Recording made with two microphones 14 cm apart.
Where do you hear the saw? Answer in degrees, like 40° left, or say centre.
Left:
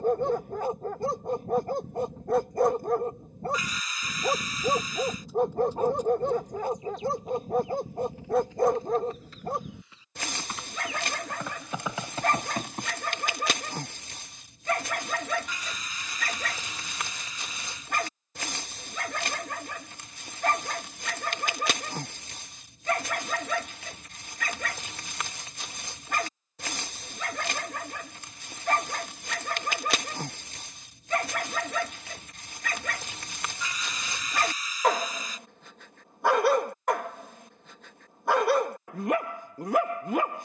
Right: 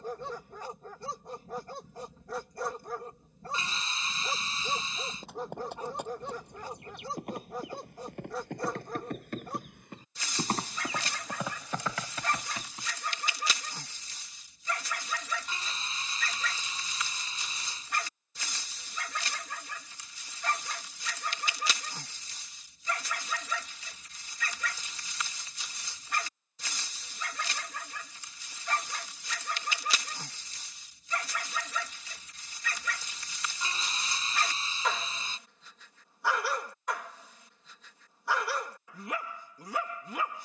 30° right.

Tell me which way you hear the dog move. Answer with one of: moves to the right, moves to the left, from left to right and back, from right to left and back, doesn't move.
doesn't move.